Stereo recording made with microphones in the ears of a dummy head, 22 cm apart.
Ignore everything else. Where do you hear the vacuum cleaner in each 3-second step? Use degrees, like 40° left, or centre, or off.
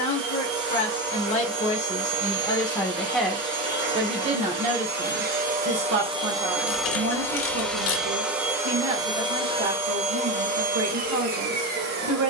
50° right, 40° right, centre, 30° right.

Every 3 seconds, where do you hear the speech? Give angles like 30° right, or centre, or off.
20° left, 30° right, 60° right, 60° right.